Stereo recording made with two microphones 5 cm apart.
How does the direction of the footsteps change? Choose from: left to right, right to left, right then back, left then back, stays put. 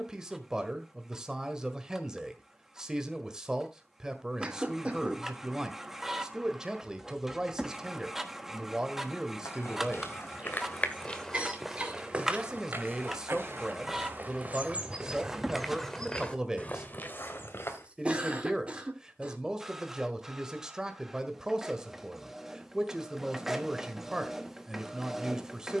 right then back.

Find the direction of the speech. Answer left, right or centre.
centre.